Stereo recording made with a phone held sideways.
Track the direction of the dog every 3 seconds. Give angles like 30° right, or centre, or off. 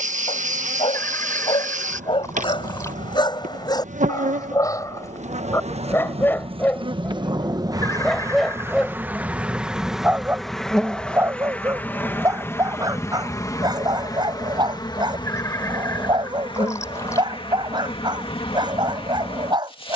30° left, 20° left, centre, 10° right, 20° right, 30° right, 30° right.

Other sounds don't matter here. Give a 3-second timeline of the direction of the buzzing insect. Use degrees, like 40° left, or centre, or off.
50° right, 50° right, 30° right, centre, 20° left, 30° left, 30° left.